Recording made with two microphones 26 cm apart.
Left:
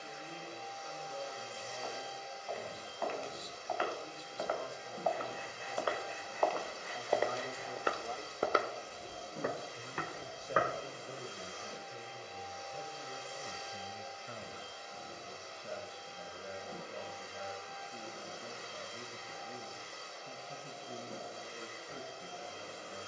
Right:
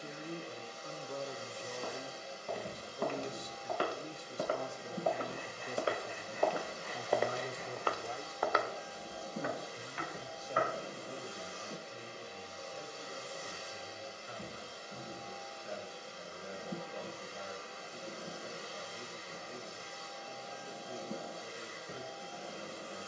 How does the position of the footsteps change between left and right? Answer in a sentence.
You can hear the footsteps go from the right side to the left.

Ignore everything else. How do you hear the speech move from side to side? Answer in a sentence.
In this clip you hear the speech go from the right side to the left.